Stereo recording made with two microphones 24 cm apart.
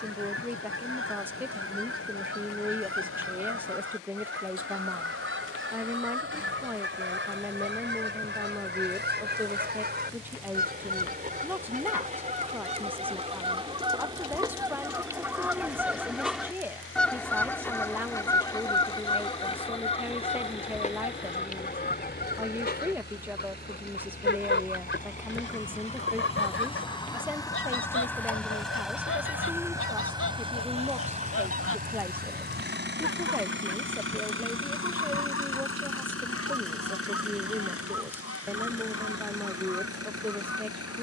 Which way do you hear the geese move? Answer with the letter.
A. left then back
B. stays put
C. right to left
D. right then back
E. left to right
C.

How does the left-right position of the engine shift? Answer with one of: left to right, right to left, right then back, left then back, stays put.
left to right.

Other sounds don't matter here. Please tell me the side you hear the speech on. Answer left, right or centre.
centre.